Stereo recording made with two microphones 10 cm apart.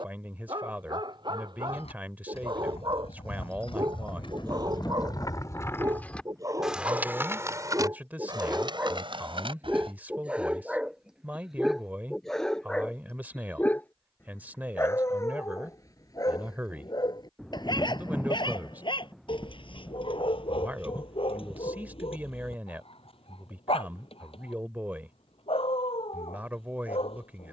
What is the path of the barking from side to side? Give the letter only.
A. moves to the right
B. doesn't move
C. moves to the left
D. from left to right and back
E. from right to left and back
C.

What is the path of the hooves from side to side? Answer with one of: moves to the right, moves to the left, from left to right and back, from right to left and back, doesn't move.
moves to the right.